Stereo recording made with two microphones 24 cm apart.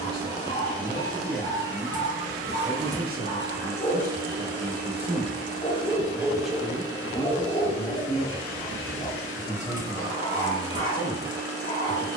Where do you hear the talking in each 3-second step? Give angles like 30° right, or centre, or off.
10° left, 30° right, 10° left, 40° left.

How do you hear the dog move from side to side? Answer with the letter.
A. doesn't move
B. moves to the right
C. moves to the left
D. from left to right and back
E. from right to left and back
A.